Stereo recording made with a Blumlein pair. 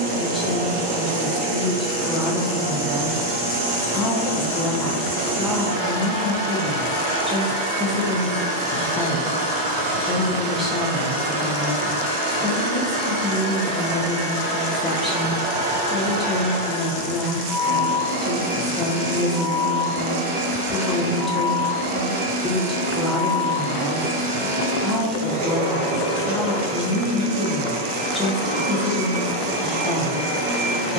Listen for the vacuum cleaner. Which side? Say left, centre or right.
right.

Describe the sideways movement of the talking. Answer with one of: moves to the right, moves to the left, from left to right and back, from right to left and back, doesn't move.
doesn't move.